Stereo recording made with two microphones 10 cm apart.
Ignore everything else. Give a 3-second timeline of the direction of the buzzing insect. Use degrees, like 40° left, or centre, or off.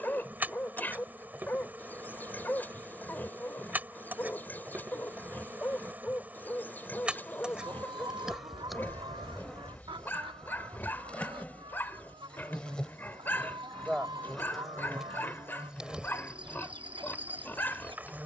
20° right, 20° right, 10° right, 10° left, centre, 10° right.